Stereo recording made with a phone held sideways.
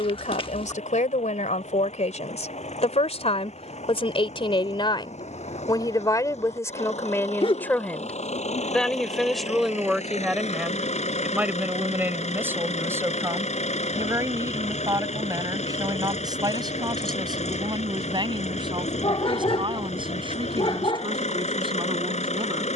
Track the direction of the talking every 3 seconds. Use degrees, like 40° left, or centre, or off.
50° left, 40° left, 20° left, centre, 20° right, 30° right, 30° right, 30° right.